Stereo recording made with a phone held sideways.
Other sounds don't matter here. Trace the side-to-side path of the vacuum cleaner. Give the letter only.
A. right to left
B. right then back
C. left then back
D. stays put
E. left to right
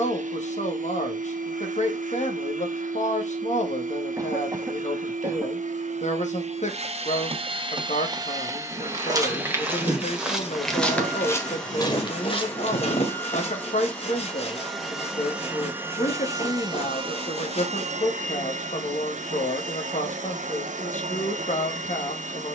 C.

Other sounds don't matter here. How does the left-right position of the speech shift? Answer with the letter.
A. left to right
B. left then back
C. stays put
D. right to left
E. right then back
C.